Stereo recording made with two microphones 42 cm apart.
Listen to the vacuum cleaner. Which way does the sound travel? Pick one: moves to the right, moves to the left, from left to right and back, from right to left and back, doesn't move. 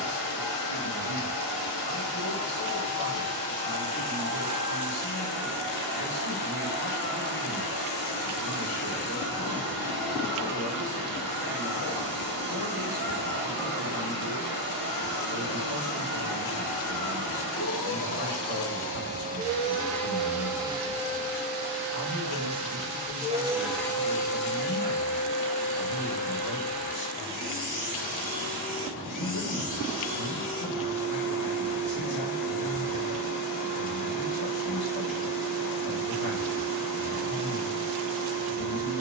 from left to right and back.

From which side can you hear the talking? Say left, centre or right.
left.